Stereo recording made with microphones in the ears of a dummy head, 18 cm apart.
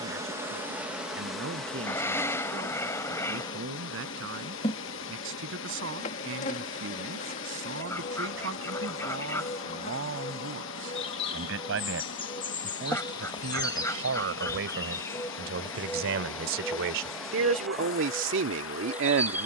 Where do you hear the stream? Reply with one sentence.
In this clip you hear the stream on the left.